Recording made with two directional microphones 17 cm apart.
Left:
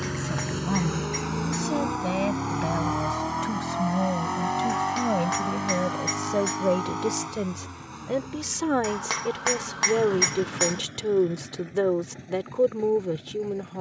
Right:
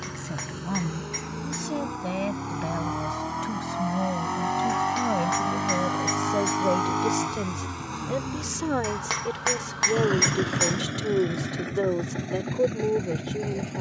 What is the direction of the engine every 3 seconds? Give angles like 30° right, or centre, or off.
30° left, centre, 40° right, 60° right, 70° right.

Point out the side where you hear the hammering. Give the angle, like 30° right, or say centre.
centre.